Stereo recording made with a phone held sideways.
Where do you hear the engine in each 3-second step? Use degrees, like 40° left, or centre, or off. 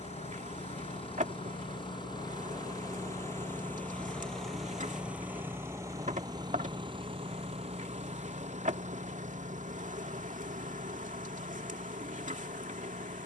40° left, centre, 40° right, 60° right, 70° right.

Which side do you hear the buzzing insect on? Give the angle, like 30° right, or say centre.
60° right.